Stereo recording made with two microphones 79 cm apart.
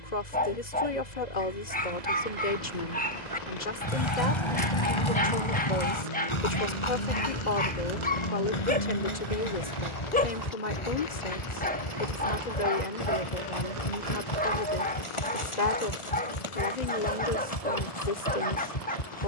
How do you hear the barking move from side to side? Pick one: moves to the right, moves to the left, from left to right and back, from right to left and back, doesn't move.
doesn't move.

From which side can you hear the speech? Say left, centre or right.
left.